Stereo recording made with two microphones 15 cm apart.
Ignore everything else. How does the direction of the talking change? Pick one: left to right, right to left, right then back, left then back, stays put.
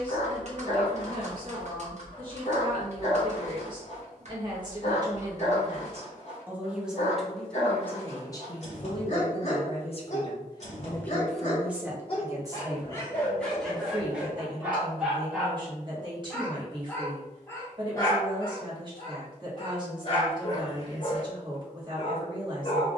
left then back.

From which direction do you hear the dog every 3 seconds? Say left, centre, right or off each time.
left, left, left, left, centre, centre, left, left.